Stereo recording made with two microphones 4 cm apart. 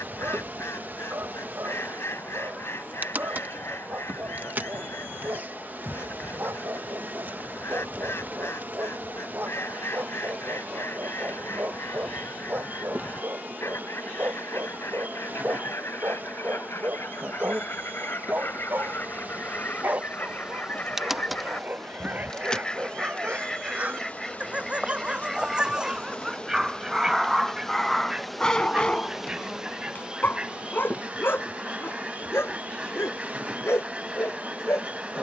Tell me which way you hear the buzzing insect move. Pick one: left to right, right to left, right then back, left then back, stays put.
left then back.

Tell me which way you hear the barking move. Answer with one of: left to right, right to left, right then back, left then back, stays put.
right to left.